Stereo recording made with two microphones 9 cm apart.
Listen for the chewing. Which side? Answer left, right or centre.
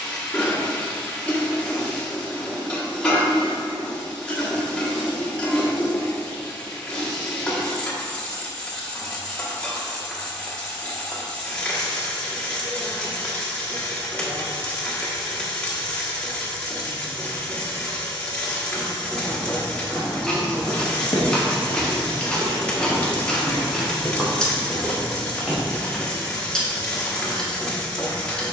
centre.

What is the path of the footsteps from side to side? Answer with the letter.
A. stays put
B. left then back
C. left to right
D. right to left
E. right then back
B.